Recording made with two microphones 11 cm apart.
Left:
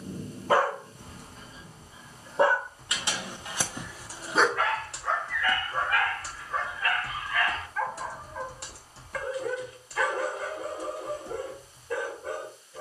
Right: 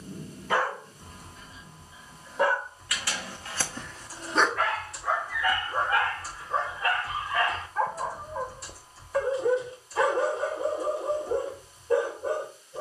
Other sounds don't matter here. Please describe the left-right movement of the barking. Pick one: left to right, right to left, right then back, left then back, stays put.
left to right.